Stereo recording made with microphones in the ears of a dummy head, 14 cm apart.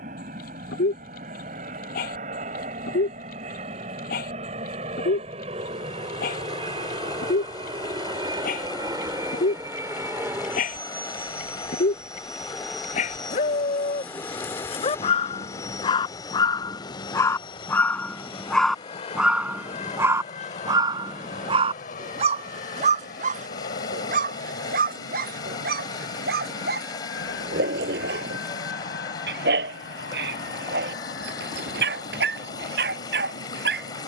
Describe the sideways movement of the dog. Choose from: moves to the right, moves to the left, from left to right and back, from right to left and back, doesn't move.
moves to the right.